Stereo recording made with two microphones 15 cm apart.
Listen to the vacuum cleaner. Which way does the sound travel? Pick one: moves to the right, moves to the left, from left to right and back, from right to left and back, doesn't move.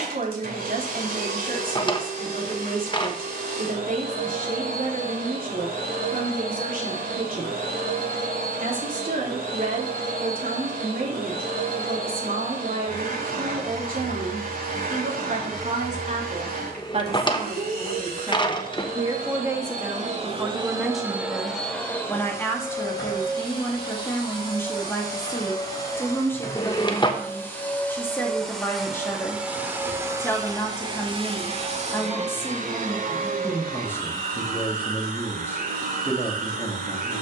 from right to left and back.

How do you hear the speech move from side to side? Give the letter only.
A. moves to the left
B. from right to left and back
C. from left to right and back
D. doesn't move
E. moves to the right
A.